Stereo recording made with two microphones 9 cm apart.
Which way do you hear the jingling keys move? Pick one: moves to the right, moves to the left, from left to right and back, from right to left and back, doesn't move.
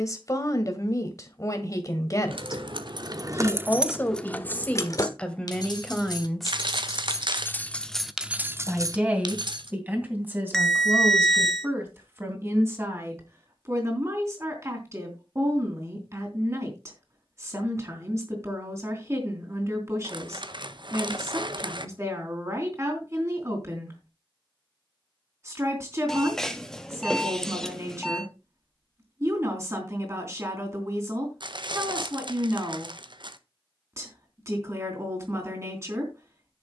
from right to left and back.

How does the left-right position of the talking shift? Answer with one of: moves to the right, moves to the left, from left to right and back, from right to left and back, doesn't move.
moves to the right.